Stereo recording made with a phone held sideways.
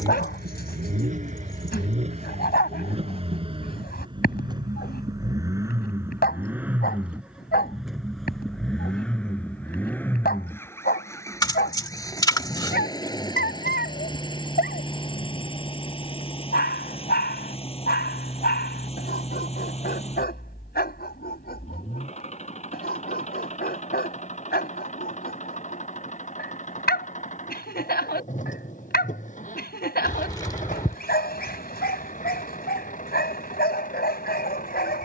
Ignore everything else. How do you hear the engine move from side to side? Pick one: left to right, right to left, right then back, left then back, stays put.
right to left.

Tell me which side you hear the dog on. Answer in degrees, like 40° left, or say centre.
80° left.